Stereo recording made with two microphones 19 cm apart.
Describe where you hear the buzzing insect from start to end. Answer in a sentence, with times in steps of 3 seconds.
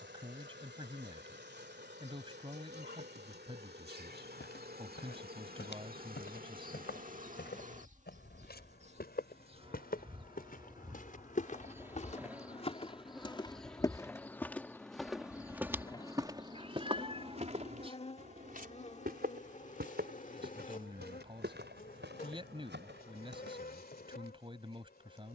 In this clip you hear the buzzing insect on the right from 0 s, in the centre from 12 s and on the left from 15 s.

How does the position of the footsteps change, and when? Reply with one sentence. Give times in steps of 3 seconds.
You can hear the footsteps not at all from 0 s, on the left from 3 s, on the right from 15 s and not at all from 24 s.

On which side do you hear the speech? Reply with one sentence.
In this clip you hear the speech on the right.